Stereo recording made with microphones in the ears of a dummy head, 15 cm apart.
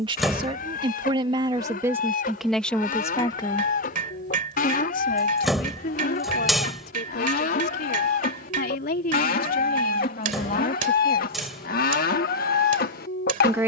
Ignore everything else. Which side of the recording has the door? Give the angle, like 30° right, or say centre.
centre.